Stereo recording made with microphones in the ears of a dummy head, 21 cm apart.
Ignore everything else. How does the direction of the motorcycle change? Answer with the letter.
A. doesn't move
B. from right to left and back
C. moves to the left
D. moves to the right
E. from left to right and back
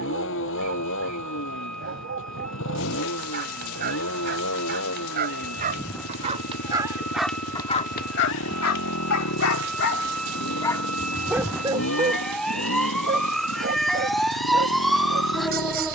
A.